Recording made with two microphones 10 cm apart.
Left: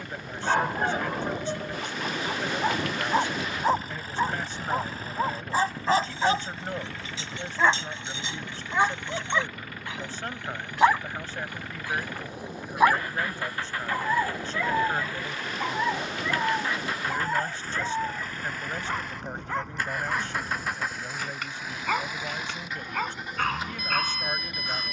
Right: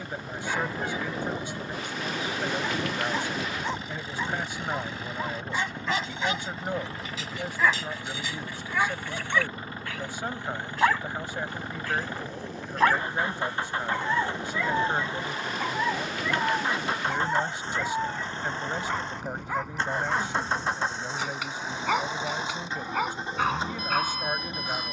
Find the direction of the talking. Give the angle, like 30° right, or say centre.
10° right.